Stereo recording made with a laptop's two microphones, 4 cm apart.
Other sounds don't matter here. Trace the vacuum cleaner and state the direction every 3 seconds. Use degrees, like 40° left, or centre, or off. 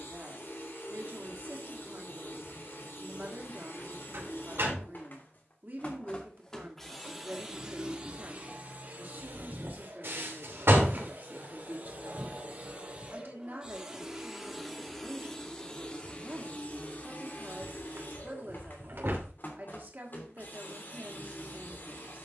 50° left, 50° left, 10° right, 50° right, 20° right, 30° left, 50° left, 50° left.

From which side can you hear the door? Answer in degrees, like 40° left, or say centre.
60° right.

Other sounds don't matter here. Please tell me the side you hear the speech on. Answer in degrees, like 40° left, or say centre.
50° right.